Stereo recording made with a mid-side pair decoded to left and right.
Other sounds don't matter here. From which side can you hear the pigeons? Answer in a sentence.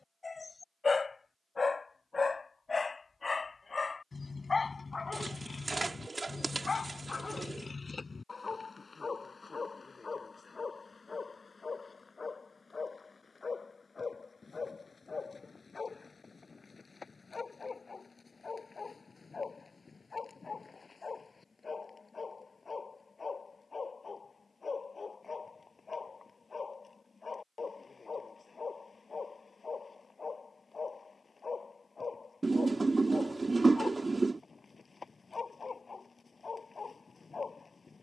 You can hear the pigeons on the right.